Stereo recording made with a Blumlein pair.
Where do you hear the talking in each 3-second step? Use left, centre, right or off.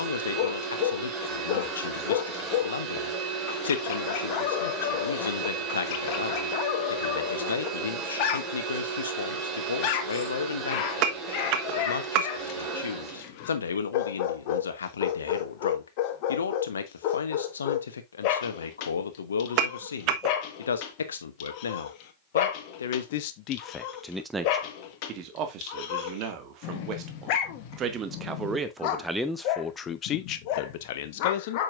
left, left, left, left, left, left, left, left, right, centre, left.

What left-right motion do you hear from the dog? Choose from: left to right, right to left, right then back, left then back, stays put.
stays put.